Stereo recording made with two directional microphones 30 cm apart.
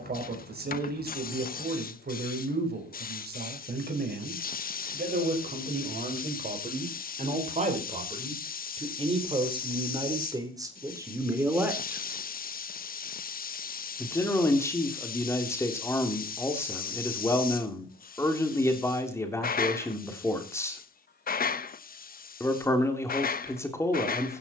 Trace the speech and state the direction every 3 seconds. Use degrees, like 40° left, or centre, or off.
30° right, 30° right, 20° right, 10° right, 10° left, 10° left, 10° left, 10° left.